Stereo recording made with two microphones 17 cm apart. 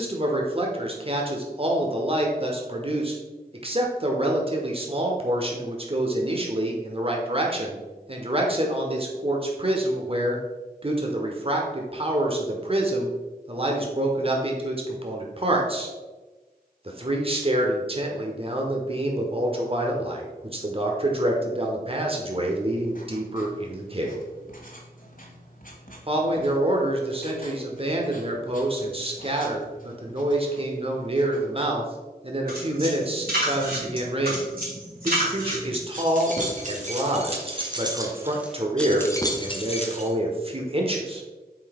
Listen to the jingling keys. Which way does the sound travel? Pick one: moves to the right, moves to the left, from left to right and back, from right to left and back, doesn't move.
moves to the left.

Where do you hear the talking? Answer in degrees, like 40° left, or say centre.
40° right.